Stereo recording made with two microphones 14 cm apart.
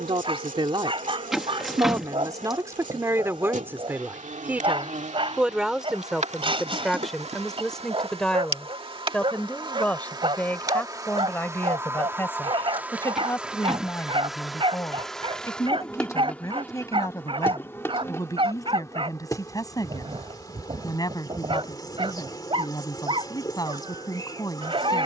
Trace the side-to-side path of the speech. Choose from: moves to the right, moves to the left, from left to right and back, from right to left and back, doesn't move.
moves to the left.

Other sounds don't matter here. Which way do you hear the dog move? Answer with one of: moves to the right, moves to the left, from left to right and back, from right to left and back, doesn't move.
doesn't move.